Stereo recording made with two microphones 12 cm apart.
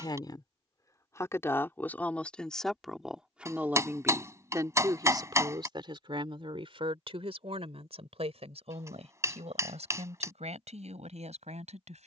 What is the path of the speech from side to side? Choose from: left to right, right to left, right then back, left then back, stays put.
left to right.